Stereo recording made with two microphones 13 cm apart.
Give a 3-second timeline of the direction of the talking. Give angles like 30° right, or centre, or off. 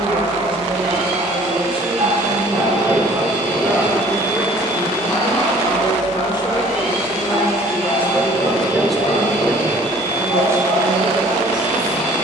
40° right, 20° left, 20° left, 20° right.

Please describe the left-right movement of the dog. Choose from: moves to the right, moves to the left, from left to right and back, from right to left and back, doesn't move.
moves to the left.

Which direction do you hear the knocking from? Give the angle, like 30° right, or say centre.
50° left.